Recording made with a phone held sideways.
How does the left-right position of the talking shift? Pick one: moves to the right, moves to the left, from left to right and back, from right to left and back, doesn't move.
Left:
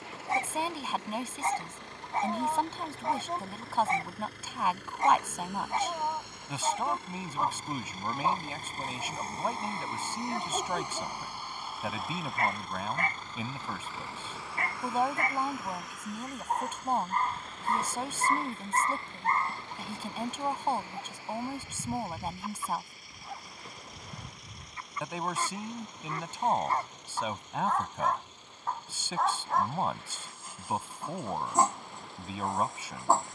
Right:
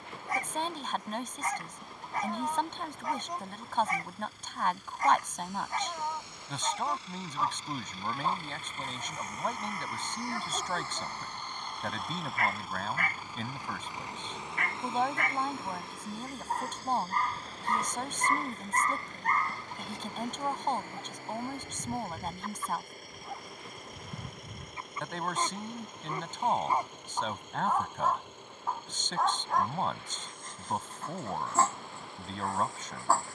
doesn't move.